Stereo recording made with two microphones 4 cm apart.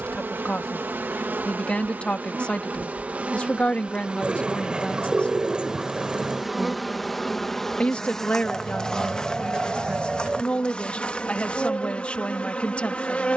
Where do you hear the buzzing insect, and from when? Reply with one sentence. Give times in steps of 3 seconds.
You can hear the buzzing insect on the right from 0 s, in the centre from 6 s and on the left from 9 s.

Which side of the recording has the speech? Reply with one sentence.
In this clip you hear the speech on the left.